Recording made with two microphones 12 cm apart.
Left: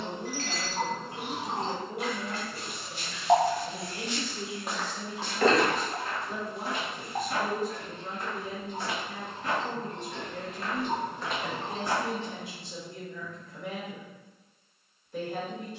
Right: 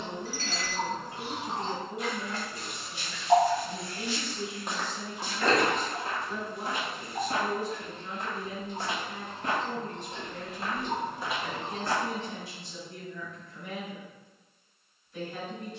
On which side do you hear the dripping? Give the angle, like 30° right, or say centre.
60° left.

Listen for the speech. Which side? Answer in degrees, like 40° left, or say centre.
70° left.